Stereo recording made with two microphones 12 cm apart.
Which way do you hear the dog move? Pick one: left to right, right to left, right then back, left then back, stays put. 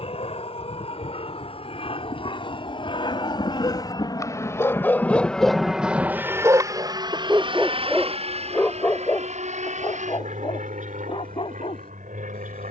right then back.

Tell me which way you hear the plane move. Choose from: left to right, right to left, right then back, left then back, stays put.
left to right.